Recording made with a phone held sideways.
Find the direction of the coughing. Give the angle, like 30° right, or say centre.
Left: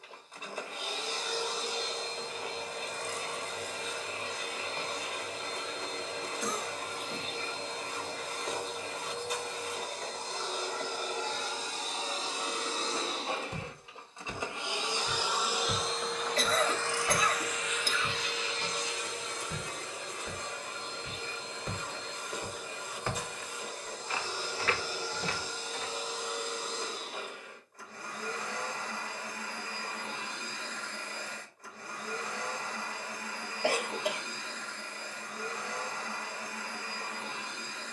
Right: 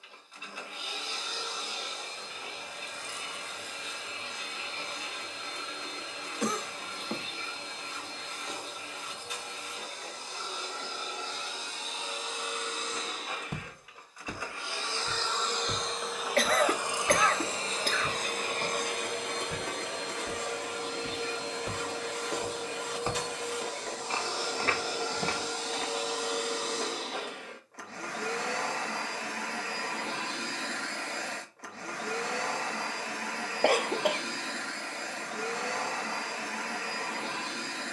60° right.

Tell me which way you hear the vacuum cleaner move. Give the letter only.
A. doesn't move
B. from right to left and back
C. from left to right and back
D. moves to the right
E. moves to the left
D.